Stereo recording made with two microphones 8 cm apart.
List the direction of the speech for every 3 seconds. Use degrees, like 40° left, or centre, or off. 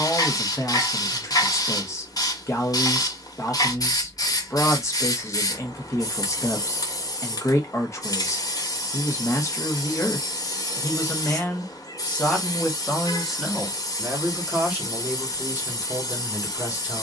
40° left, 40° left, 40° left, 30° left, centre, 20° right.